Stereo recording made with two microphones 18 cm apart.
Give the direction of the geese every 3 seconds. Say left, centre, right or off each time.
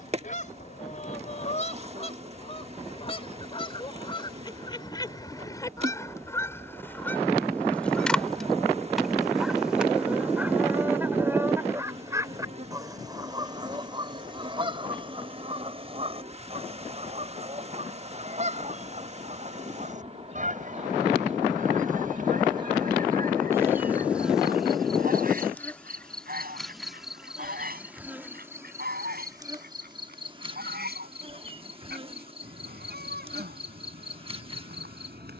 left, left, centre, centre, right, right, right, right, right, right, right, right.